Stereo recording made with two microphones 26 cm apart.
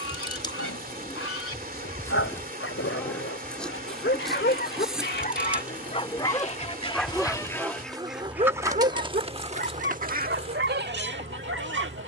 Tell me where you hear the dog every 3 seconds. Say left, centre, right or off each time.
left, left, centre, right.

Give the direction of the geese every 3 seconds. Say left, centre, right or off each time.
left, left, centre, right.